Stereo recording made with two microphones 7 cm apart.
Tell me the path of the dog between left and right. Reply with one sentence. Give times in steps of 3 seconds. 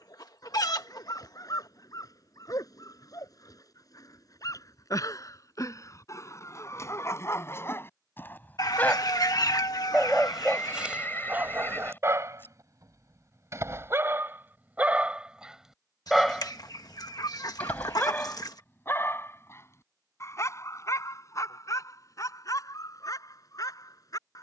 You can hear the dog on the left from 0 s, in the centre from 9 s, on the right from 12 s, in the centre from 15 s and on the left from 18 s.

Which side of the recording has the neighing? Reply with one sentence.
In this clip you hear the neighing on the left.